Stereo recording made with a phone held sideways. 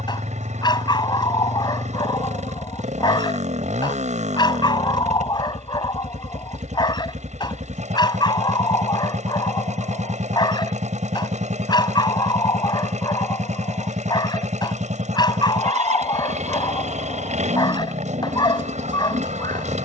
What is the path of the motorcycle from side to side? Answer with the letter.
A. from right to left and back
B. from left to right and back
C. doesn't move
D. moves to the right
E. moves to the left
C.